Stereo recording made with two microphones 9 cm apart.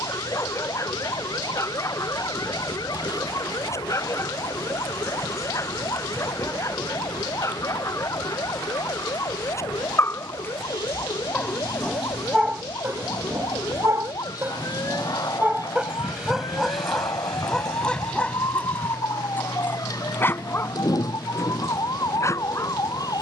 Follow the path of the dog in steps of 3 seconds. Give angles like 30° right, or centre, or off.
30° left, 30° left, 30° left, 20° left, 20° right, centre, 20° left, 30° left.